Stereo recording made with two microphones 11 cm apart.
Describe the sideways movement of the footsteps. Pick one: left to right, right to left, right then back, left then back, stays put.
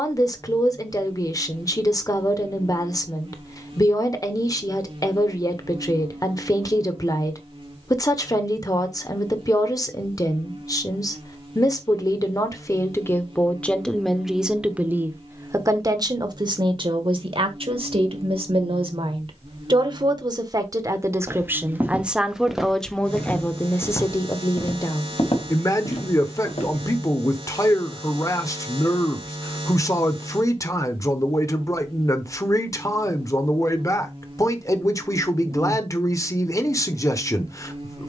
right to left.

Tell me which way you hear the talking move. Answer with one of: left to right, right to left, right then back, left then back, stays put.
right then back.